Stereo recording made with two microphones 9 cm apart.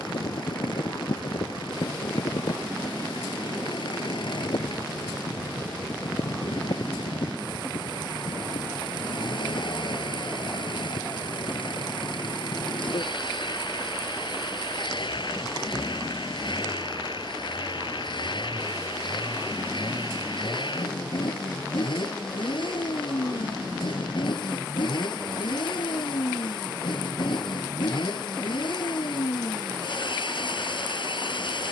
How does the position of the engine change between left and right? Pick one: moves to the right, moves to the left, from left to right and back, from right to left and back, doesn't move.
doesn't move.